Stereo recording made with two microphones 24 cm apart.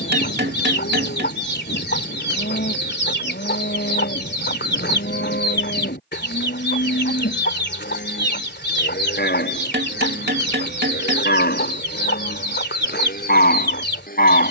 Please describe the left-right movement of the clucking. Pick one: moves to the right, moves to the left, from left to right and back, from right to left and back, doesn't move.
doesn't move.